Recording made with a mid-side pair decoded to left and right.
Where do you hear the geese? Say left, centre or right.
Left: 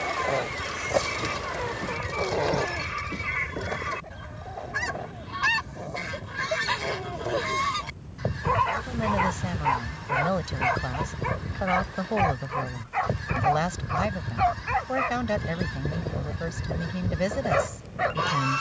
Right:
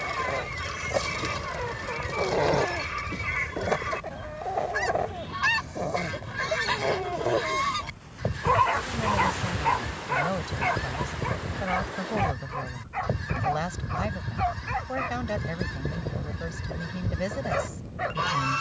centre.